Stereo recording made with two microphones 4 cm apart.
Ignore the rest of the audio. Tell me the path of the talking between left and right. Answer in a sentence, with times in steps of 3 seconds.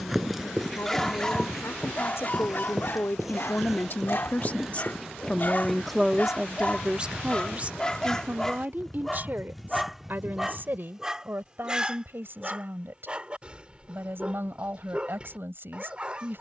You can hear the talking on the left from 0 s and on the right from 6 s.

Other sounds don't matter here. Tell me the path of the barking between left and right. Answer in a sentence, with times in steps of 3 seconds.
In this clip you hear the barking on the left from 0 s, in the centre from 9 s and on the right from 12 s.